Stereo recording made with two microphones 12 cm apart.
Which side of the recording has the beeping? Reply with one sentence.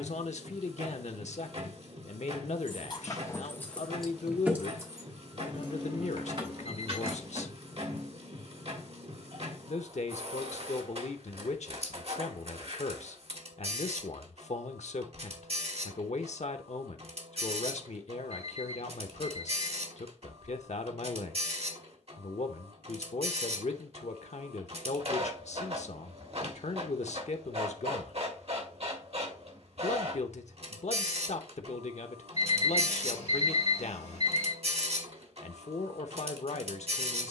You can hear the beeping on the left.